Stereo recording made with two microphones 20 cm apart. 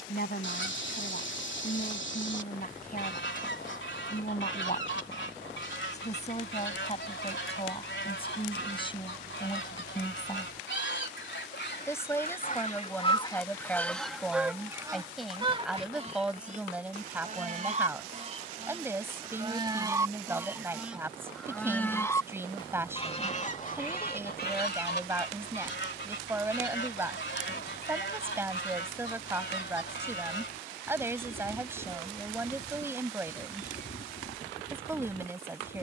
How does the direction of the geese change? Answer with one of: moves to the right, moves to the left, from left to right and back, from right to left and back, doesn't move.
from left to right and back.